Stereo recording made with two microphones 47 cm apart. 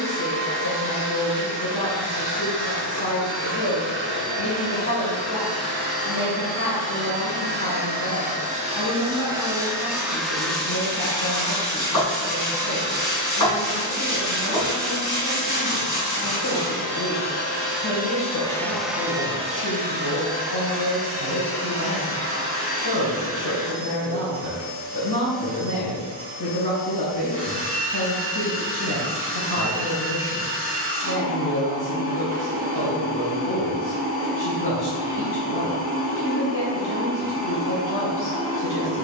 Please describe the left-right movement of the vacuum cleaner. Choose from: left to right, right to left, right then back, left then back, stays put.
left then back.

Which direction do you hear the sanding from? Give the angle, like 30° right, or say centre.
40° left.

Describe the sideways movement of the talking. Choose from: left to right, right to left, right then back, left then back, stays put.
stays put.